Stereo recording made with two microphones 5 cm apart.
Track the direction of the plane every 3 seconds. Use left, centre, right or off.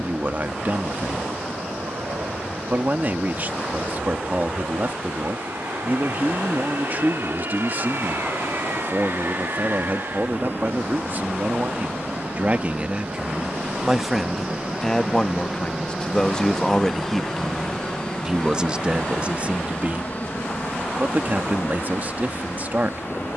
right, right, right, right, right, centre, left, left.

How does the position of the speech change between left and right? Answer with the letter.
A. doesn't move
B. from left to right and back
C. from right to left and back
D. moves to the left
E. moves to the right
C.